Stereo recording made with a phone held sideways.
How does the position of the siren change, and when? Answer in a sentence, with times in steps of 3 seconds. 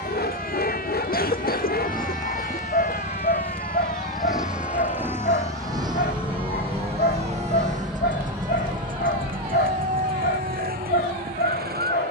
You can hear the siren on the left from 0 s, in the centre from 6 s and on the right from 9 s.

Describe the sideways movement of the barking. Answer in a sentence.
You can hear the barking stay in one place.